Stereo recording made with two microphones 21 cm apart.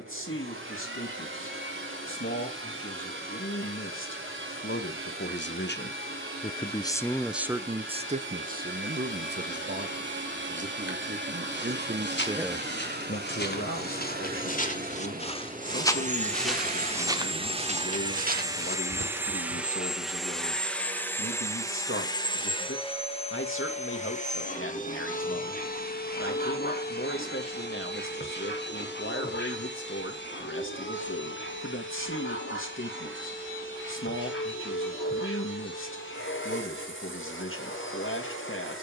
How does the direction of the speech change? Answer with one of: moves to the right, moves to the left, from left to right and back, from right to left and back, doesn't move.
from left to right and back.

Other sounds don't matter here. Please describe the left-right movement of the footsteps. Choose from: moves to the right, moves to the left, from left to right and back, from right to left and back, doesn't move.
moves to the right.